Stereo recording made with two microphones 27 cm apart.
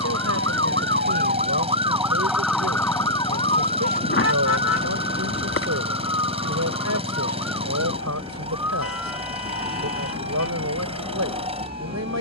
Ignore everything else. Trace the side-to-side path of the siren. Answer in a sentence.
In this clip you hear the siren go from the right side to the left.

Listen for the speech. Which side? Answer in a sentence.
You can hear the speech on the right.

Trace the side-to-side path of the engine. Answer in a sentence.
You can hear the engine stay in one place.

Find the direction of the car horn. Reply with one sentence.
You can hear the car horn on the left.